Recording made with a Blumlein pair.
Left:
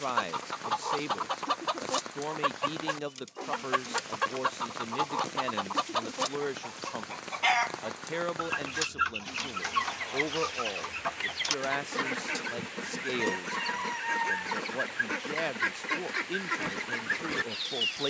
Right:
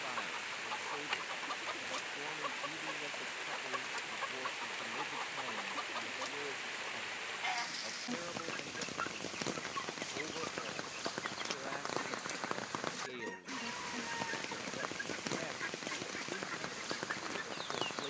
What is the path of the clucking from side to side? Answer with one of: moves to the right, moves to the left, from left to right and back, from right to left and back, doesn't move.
doesn't move.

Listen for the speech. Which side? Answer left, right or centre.
left.